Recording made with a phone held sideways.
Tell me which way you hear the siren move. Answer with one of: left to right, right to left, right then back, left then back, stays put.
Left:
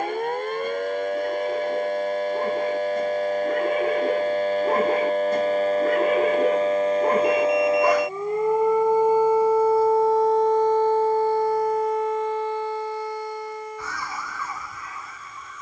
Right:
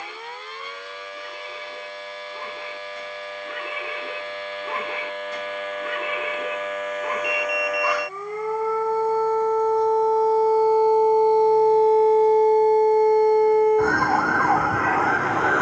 left to right.